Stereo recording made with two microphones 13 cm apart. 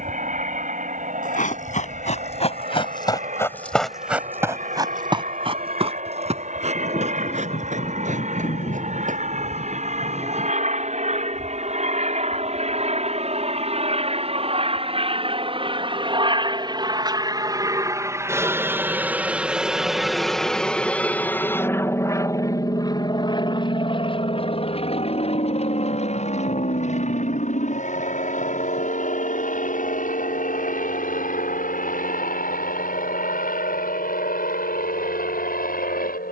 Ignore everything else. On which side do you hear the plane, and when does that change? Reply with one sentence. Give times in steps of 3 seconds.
You can hear the plane on the right from 0 s, in the centre from 18 s and on the left from 21 s.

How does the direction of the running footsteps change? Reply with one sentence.
In this clip you hear the running footsteps move to the right.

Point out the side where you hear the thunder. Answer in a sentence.
You can hear the thunder on the left.